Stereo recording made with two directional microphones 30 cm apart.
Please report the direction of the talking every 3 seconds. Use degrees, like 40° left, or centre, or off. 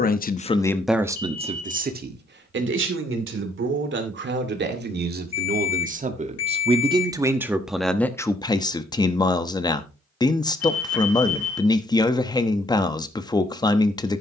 10° right, 40° right, centre, 10° left, 10° left.